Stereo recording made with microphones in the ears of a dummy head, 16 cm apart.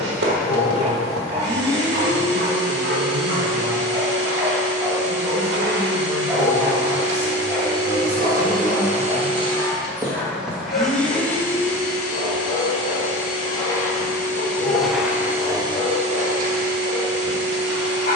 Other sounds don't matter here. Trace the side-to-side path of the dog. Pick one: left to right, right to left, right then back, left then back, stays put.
right to left.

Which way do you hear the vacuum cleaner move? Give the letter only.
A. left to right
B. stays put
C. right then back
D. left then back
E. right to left
D.